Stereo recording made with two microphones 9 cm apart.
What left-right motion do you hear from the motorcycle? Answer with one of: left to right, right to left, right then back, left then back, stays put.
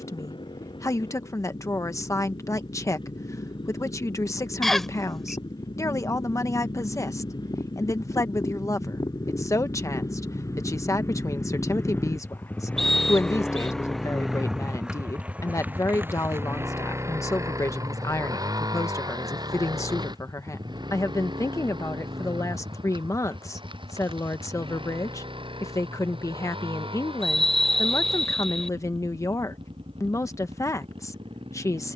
left to right.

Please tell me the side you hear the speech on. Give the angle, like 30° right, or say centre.
40° left.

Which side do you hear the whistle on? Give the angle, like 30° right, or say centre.
centre.